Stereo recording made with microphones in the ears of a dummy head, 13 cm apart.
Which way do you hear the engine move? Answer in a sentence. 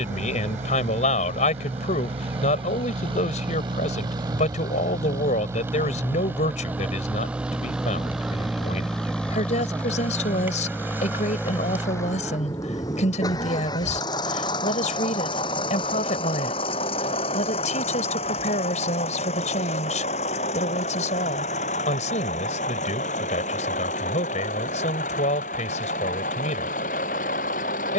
You can hear the engine move to the left.